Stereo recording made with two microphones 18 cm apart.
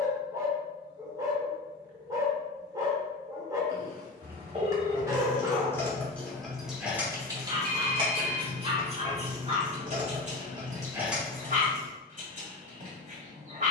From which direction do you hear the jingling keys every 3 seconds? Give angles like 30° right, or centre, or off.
off, 20° left, 20° right, 20° right, off.